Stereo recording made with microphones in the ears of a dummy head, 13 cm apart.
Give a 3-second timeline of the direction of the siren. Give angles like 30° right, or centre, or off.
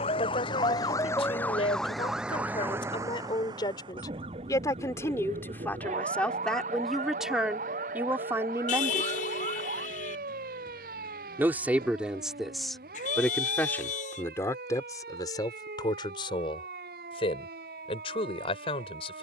10° left, 40° right, 60° right, 70° right, 70° right, 70° right, 70° right.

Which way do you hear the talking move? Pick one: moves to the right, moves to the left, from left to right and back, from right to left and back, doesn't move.
from left to right and back.